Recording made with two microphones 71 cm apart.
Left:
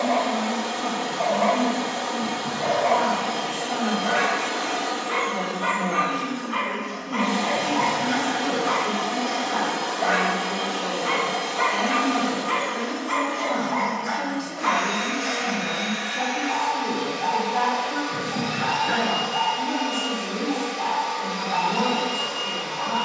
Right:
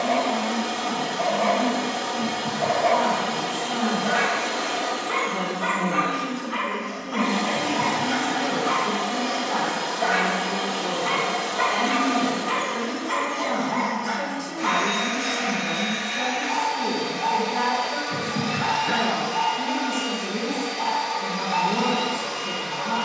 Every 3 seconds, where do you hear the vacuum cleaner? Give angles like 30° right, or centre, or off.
60° right, 20° right, 20° left, 30° right, 50° right, 50° right, 50° right, 50° right.